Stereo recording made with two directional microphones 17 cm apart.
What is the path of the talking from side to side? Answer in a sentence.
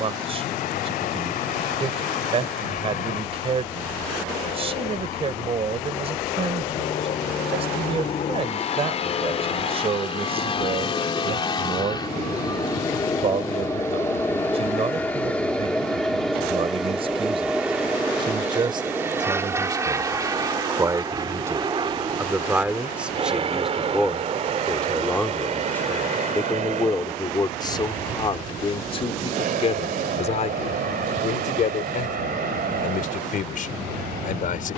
You can hear the talking go from the right side to the left.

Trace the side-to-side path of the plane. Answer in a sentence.
You can hear the plane move to the right.